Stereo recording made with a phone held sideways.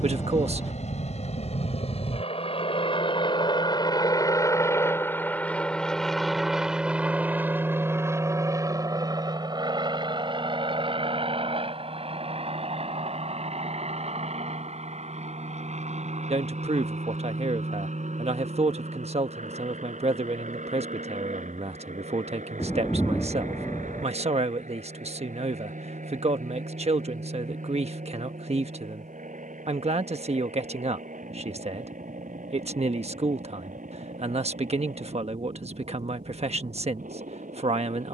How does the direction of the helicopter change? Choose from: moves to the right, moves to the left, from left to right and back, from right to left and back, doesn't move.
moves to the right.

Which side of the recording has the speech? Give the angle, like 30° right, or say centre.
50° right.